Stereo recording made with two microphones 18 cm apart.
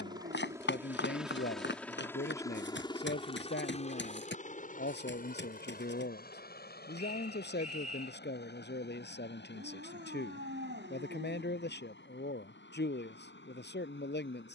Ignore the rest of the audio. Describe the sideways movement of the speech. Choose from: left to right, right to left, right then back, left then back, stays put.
stays put.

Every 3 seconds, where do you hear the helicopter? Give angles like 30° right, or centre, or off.
centre, 40° left, 60° left, 70° left, 70° left.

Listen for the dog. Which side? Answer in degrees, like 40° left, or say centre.
80° right.